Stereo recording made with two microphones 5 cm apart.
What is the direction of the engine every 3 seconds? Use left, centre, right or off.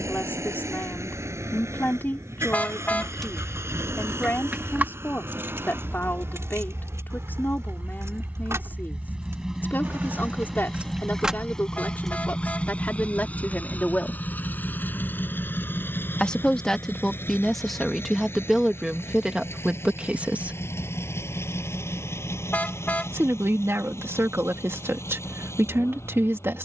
right, right, right, centre, left, left, left, left, left.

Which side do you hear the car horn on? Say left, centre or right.
left.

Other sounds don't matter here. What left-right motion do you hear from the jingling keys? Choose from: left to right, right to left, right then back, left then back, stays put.
right then back.